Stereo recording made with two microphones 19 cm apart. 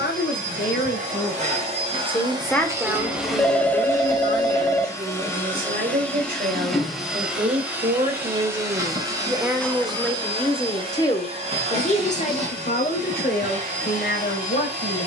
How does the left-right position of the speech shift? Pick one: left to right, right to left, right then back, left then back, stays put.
right then back.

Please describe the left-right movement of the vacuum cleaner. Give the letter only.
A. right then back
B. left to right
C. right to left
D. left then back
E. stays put
D.